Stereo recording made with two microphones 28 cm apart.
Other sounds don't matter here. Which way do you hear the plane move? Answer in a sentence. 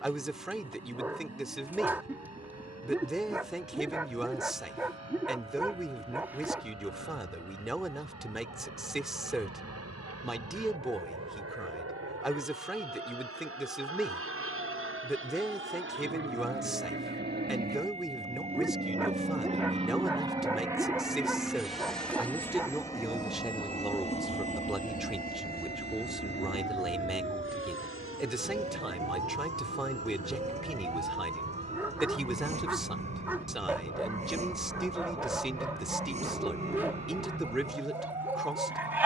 In this clip you hear the plane move from right to left.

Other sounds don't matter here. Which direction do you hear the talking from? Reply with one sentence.
In this clip you hear the talking in the centre.